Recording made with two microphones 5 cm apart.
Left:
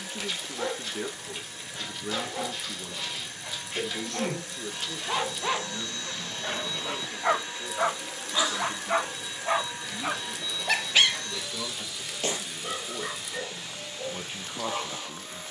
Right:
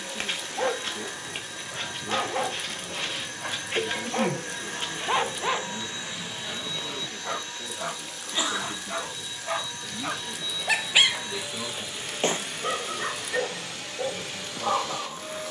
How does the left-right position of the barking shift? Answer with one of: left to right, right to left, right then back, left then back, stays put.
left then back.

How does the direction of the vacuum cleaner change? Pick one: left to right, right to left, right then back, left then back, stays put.
left then back.